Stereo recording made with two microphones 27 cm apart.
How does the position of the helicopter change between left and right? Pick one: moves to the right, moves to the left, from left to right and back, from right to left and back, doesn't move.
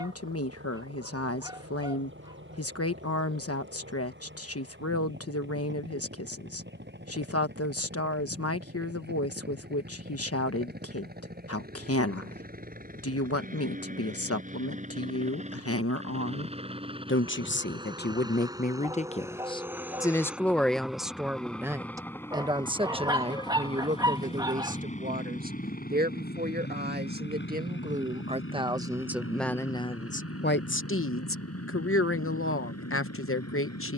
moves to the left.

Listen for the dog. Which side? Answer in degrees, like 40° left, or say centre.
20° right.